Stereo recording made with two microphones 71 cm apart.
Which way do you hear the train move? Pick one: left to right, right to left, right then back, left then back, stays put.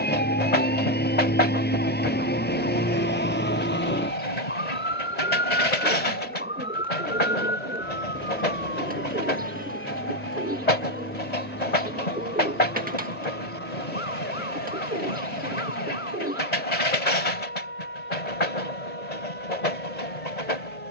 stays put.